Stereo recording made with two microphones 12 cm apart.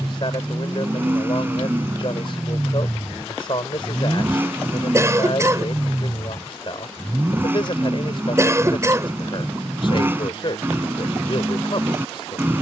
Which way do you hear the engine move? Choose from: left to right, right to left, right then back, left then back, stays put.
stays put.